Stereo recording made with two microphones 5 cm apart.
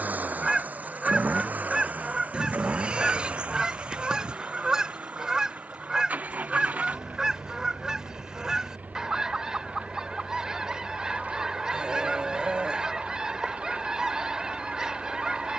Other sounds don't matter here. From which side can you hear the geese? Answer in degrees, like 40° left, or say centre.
20° right.